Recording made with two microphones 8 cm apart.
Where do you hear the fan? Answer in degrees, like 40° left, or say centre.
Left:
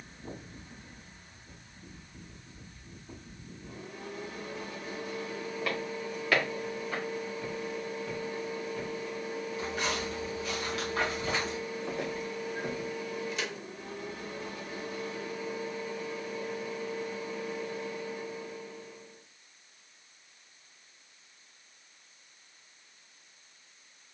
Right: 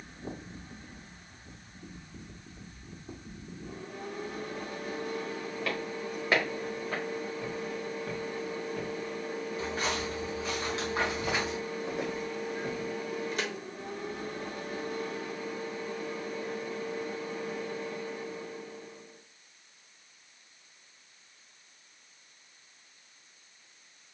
50° right.